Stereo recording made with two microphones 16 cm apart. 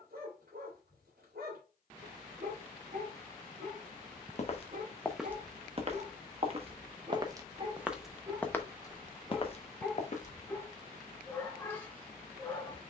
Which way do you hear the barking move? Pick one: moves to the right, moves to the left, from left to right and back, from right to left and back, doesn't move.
moves to the left.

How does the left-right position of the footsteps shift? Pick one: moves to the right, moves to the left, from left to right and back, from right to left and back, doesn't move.
from left to right and back.